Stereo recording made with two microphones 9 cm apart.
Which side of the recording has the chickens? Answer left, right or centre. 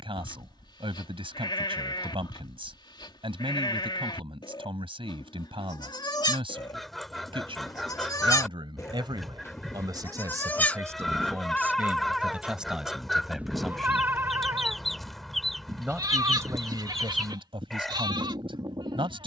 centre.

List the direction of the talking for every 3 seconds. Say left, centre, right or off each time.
right, right, right, right, centre, right, right.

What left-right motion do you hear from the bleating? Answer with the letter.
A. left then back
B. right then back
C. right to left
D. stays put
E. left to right
E.